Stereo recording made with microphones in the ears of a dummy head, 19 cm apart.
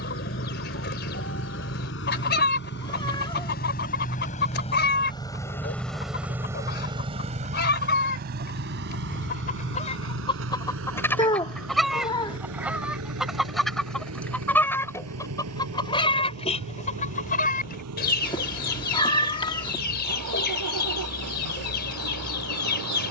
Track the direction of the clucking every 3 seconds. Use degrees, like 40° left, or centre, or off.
50° left, 50° left, 50° left, 20° left, centre, 30° left, 50° left, 50° left.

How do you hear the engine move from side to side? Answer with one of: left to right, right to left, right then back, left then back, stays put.
left to right.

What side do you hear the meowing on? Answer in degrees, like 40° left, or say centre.
20° left.